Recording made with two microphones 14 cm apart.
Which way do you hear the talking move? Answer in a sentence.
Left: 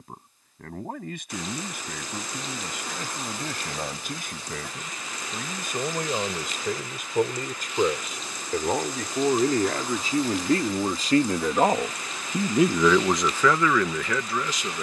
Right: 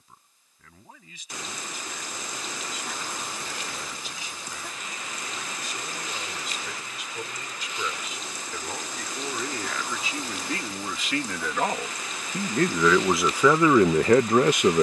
In this clip you hear the talking go from the left side to the right.